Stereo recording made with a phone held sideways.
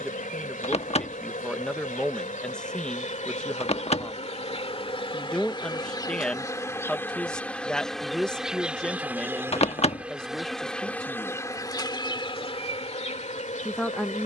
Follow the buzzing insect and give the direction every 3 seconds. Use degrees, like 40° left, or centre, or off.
50° left, 40° left, 10° left, centre, 40° left.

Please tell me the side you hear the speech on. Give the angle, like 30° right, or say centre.
centre.